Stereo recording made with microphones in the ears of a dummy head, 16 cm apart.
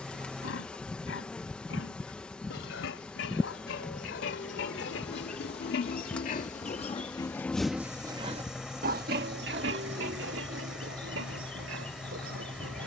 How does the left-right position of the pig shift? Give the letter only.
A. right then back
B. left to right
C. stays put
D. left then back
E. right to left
B.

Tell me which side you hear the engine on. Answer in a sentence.
In this clip you hear the engine in the centre.